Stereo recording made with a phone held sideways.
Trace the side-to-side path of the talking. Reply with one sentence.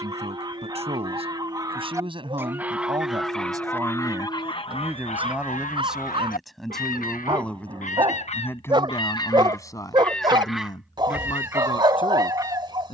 You can hear the talking move to the left.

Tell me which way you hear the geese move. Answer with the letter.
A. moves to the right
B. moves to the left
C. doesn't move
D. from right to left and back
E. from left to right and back
D.